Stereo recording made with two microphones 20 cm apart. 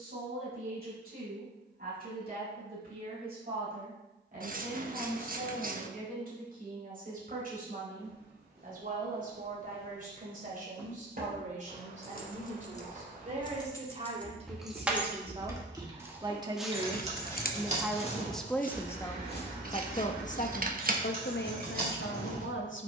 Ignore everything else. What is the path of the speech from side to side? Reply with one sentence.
You can hear the speech move from right to left.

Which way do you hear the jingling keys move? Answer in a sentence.
In this clip you hear the jingling keys travel towards the right.